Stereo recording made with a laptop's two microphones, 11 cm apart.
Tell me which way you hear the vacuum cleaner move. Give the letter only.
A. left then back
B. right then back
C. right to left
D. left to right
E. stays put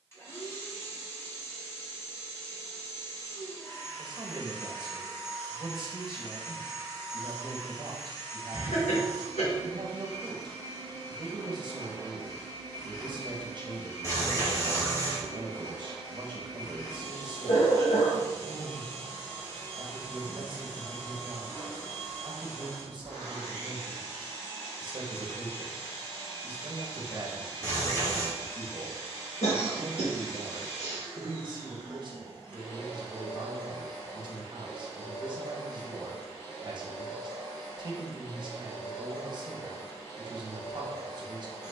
E.